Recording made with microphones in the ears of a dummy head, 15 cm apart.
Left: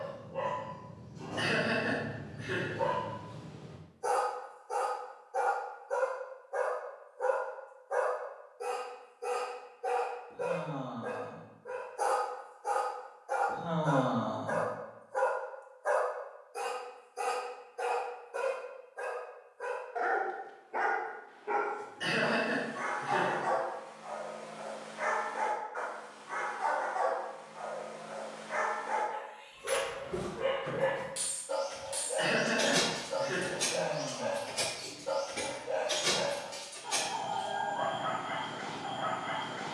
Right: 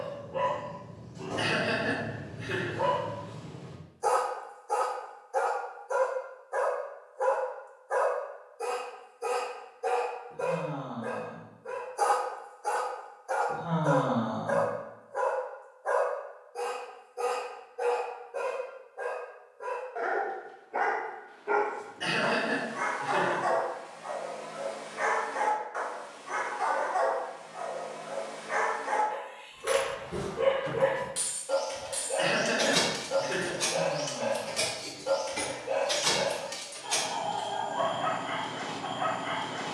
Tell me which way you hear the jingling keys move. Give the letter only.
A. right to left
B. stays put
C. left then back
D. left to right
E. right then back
C.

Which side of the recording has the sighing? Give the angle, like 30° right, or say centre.
60° left.